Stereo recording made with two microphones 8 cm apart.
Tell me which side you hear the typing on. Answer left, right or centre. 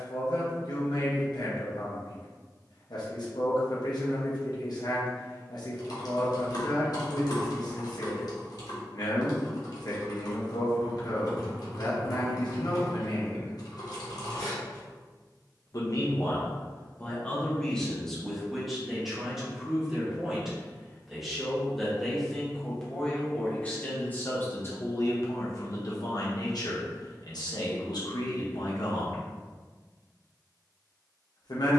left.